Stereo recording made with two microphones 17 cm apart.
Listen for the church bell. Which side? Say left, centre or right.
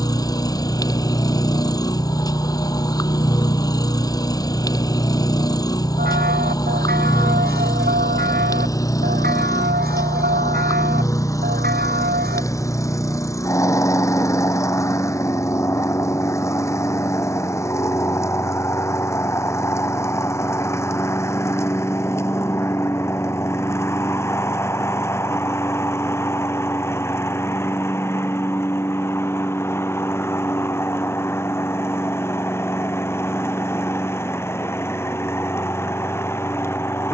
right.